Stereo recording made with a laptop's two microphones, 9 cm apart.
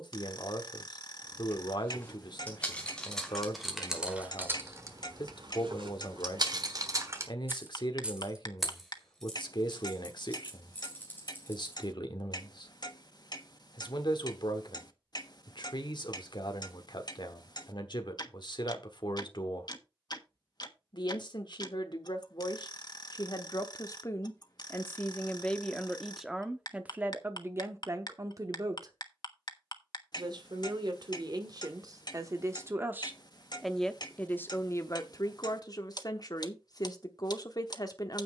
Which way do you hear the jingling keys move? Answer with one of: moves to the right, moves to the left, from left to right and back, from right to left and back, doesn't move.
from left to right and back.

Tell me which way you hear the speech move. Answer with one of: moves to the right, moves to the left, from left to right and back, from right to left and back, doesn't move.
from left to right and back.